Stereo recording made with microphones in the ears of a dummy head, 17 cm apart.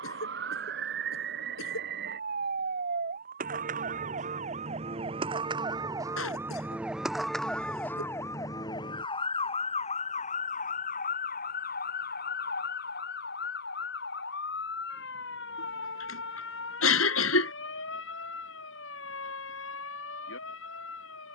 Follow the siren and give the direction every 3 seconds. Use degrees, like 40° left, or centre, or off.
60° right, 40° right, centre, 40° left, 60° left, 70° left, 70° left.